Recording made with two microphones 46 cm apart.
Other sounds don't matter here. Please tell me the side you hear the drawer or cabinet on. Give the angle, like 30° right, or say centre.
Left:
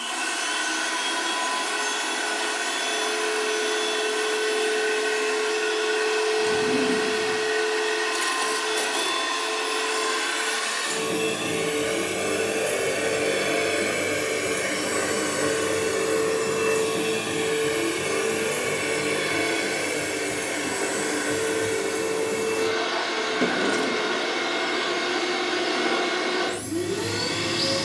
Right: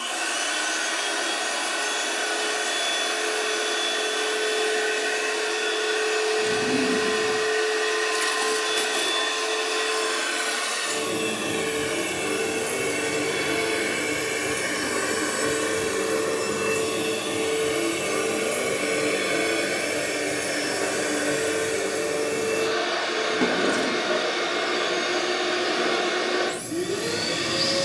10° right.